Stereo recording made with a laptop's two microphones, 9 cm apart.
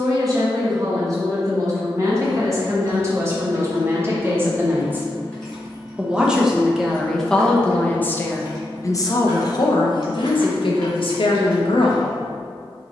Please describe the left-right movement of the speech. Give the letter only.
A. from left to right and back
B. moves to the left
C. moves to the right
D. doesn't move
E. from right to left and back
B.